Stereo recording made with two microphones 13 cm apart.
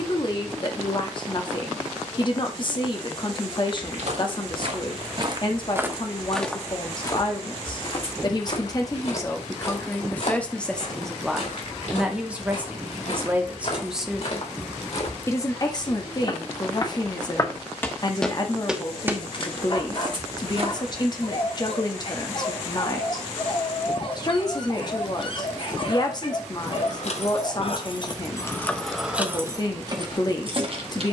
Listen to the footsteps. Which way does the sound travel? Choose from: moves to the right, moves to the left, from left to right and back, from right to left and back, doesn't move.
from right to left and back.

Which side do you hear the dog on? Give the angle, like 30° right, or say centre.
40° left.